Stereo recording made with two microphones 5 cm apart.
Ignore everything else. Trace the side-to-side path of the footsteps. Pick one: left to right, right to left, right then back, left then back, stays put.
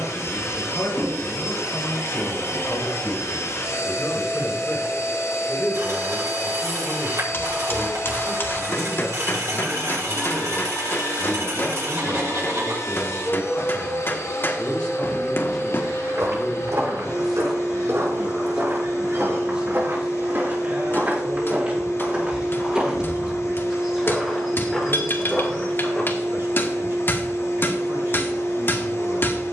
right to left.